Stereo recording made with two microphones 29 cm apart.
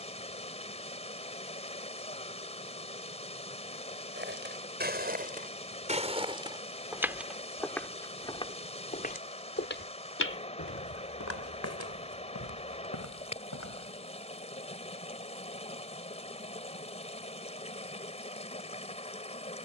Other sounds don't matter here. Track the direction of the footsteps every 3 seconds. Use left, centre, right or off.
off, right, centre, left, left, off, off.